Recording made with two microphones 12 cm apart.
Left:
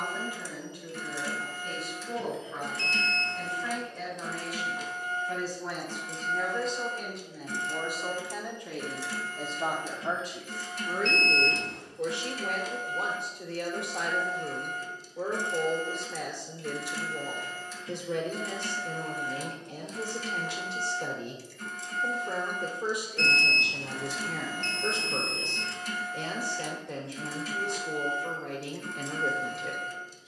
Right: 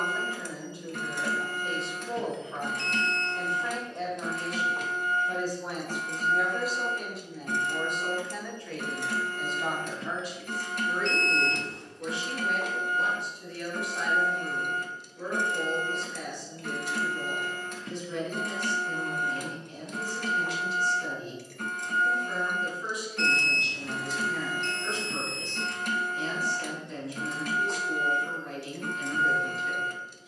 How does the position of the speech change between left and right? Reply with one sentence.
In this clip you hear the speech travel towards the left.